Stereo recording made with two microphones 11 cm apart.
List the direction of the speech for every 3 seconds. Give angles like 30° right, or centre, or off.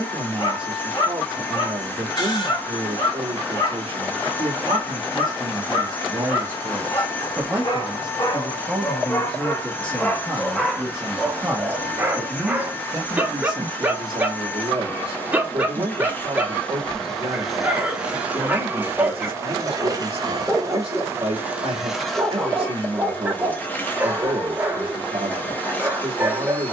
60° right, 50° right, 20° right, centre, 40° right, 50° right, 50° right, 50° right, 50° right.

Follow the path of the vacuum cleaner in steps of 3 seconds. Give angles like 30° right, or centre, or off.
20° left, 20° left, 20° left, 20° left, 20° left, 10° left, 30° right, 10° left, 20° left.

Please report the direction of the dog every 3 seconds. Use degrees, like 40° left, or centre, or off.
50° left, 50° left, 40° left, 10° left, 10° right, 10° right, 10° right, 10° right, 10° right.